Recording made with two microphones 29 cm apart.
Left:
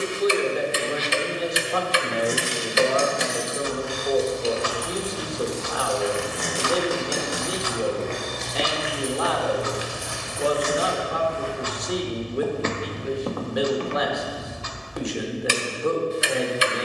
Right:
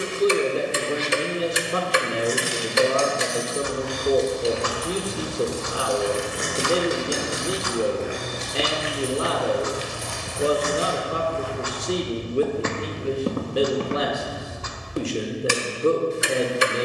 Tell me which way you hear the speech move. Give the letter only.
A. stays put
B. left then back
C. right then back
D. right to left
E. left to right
A.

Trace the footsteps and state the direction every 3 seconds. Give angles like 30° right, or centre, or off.
off, 60° right, 20° right, 20° left, 30° right, off.